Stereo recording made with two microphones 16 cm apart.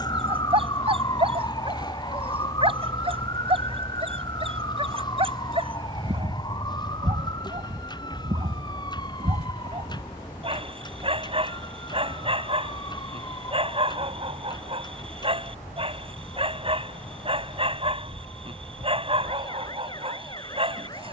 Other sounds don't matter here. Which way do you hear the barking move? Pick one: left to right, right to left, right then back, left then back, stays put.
stays put.